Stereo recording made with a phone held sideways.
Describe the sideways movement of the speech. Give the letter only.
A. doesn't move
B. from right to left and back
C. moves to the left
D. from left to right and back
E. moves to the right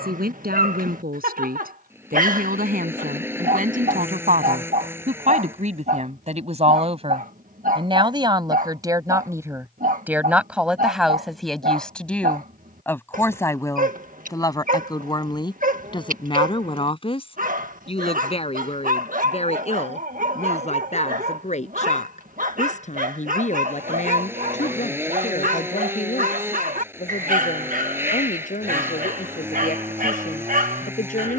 C.